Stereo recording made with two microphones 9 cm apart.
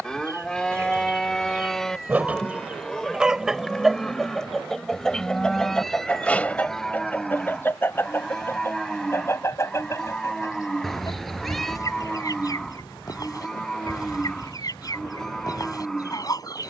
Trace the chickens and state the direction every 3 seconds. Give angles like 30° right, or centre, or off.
20° right, centre, 20° left, 30° left, 40° left, 40° left.